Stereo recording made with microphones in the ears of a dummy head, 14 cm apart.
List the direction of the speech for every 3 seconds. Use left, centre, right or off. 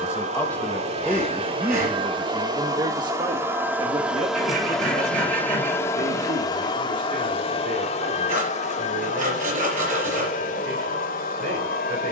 centre, right, right, right.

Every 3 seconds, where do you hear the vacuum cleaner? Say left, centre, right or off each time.
right, centre, left, left.